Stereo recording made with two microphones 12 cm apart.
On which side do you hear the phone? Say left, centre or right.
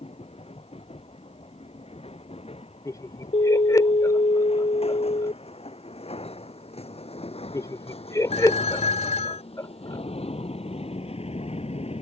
left.